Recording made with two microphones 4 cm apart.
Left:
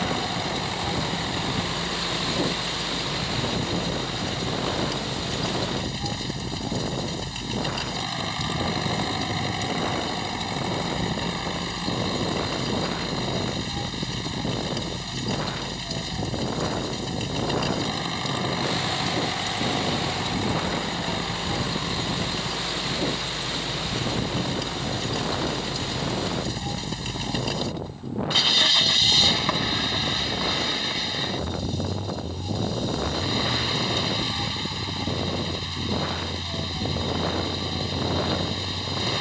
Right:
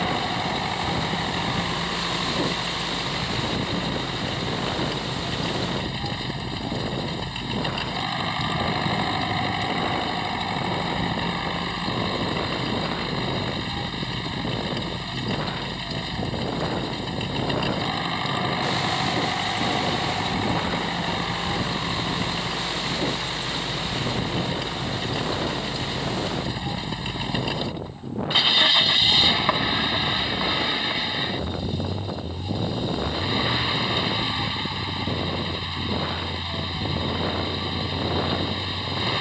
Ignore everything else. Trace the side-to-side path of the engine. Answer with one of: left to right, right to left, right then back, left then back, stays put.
stays put.